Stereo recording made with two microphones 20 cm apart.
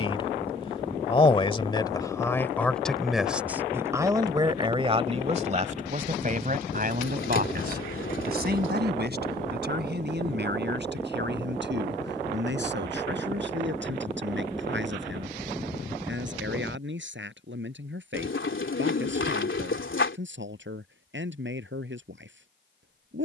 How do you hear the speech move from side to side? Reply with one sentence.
In this clip you hear the speech move from left to right.